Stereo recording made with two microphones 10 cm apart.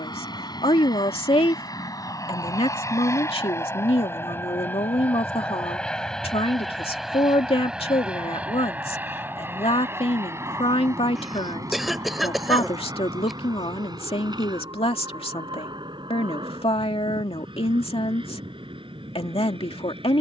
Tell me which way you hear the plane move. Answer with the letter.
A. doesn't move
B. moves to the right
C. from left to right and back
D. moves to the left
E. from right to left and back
B.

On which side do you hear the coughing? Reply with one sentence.
You can hear the coughing in the centre.